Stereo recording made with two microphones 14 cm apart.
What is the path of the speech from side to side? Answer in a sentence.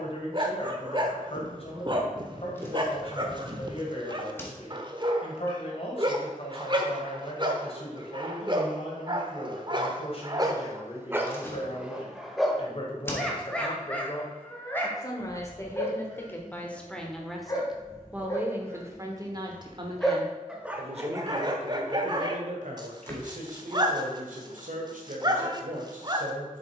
In this clip you hear the speech move to the right.